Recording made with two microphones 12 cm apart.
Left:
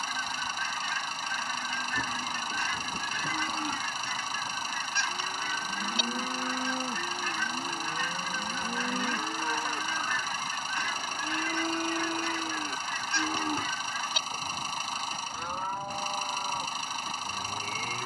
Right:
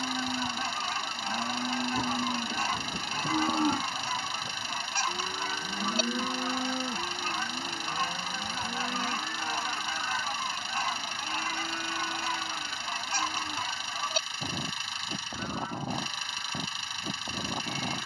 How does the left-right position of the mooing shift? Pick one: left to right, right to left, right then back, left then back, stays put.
right to left.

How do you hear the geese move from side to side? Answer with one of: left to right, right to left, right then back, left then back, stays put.
stays put.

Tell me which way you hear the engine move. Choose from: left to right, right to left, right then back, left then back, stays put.
stays put.